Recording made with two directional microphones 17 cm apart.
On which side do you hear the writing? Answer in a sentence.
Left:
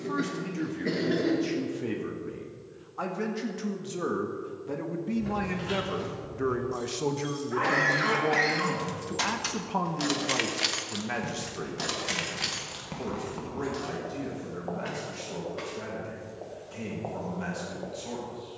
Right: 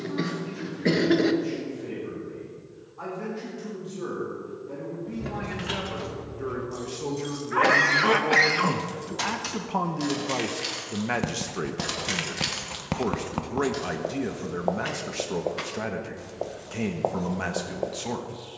You can hear the writing on the right.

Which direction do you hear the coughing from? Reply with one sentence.
You can hear the coughing on the right.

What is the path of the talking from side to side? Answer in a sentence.
In this clip you hear the talking move from left to right.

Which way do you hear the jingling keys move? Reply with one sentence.
You can hear the jingling keys move from right to left and back again.